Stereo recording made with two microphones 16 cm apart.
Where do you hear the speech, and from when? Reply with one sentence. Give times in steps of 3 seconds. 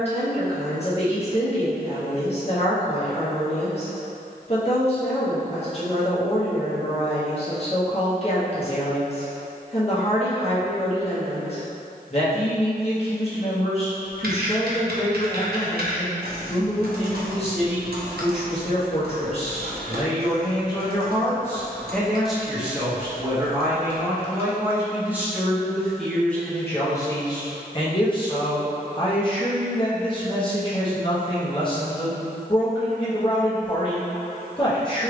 You can hear the speech on the left from 0 s, in the centre from 21 s and on the left from 27 s.